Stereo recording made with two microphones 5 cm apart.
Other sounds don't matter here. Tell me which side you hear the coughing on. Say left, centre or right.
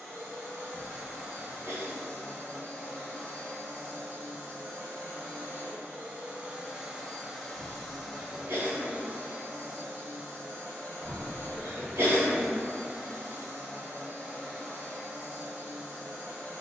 right.